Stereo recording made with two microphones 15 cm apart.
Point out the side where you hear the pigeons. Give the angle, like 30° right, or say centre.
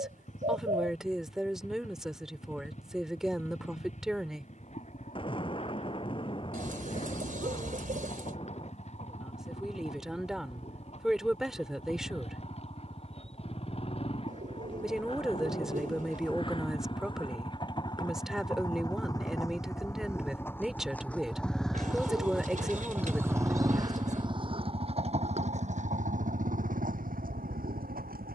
60° right.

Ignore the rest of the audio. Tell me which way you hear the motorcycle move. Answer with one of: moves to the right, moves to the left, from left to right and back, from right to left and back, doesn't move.
moves to the right.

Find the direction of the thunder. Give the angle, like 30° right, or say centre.
40° left.